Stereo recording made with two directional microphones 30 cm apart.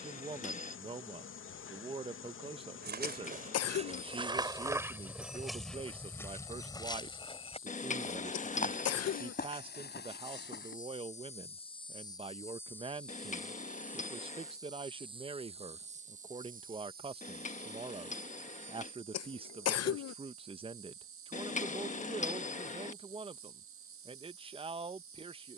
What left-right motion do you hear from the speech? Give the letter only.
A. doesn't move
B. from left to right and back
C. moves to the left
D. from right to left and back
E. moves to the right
A.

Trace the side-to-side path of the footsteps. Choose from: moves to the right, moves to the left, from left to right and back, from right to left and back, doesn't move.
moves to the left.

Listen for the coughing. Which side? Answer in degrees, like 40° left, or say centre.
50° left.